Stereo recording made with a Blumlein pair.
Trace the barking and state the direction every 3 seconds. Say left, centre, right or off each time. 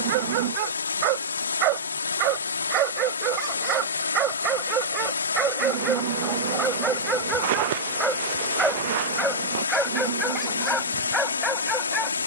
right, right, centre, centre.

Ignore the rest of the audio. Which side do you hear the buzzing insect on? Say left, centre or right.
right.